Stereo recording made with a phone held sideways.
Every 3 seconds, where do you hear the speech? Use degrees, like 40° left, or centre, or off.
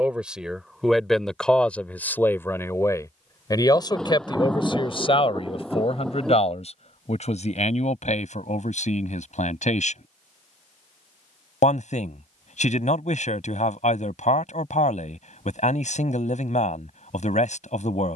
10° left, 40° left, 60° left, 60° left, 60° left, 60° left.